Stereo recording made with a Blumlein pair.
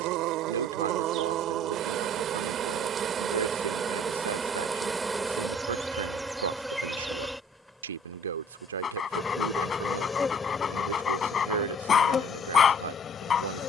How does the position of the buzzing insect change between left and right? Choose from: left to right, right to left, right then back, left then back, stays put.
right to left.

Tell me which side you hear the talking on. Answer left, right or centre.
right.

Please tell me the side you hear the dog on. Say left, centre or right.
left.